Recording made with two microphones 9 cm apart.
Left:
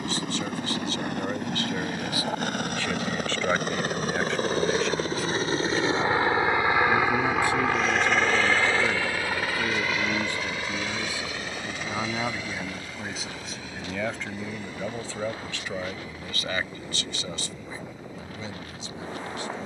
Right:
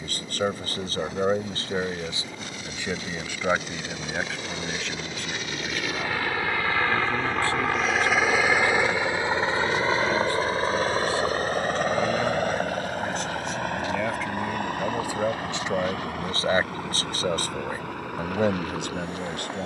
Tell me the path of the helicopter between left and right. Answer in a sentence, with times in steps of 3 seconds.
You can hear the helicopter on the left from 0 s, in the centre from 6 s and on the right from 9 s.